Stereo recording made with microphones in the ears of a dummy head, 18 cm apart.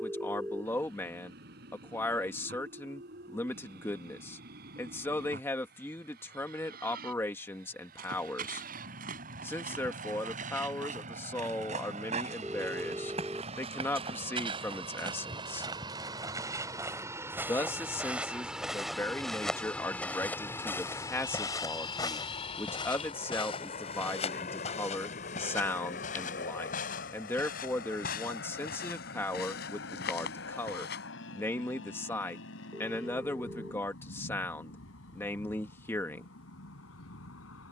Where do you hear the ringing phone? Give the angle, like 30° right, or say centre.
10° right.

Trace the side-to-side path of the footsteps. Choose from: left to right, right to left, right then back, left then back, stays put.
right to left.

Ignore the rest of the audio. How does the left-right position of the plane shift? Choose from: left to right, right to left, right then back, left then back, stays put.
right to left.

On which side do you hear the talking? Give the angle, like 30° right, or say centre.
10° left.